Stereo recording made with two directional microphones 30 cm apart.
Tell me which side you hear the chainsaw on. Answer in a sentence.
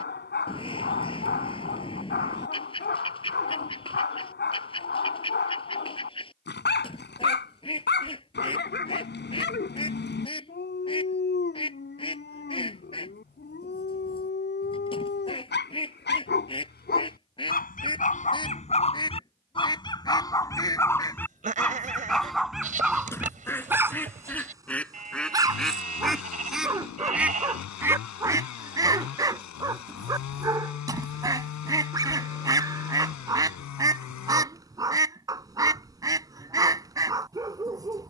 In this clip you hear the chainsaw on the left.